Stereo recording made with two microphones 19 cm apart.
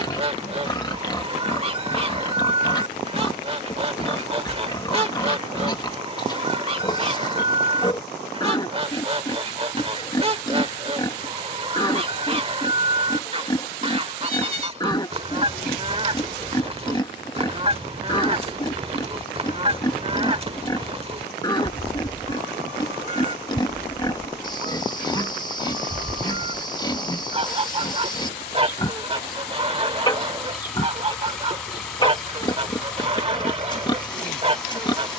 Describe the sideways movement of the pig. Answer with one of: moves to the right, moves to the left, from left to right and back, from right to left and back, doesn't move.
doesn't move.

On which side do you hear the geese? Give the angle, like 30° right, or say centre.
30° right.